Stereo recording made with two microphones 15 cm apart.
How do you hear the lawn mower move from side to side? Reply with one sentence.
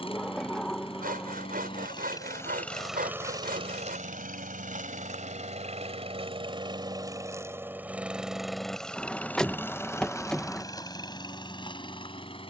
You can hear the lawn mower go right and come back.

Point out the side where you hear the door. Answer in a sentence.
In this clip you hear the door in the centre.